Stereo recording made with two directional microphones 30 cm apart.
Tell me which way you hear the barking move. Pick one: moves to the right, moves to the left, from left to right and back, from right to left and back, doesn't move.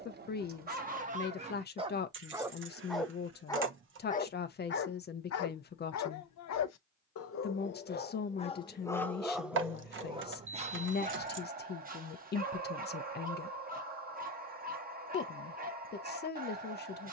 from right to left and back.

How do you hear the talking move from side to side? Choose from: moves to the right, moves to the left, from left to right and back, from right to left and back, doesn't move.
doesn't move.